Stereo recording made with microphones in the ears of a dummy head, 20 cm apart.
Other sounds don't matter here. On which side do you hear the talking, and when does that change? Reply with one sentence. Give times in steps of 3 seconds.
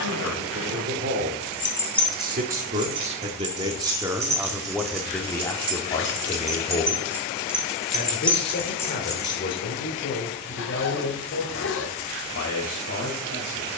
In this clip you hear the talking on the right from 0 s, in the centre from 3 s and on the left from 6 s.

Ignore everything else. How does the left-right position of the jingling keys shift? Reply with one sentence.
You can hear the jingling keys move from left to right and back again.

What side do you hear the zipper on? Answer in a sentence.
In this clip you hear the zipper on the left.